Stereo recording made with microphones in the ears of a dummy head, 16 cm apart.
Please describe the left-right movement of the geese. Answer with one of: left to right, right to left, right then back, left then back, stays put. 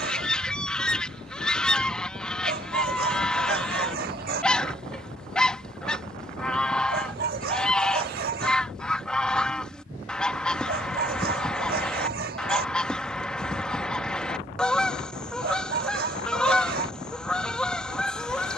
stays put.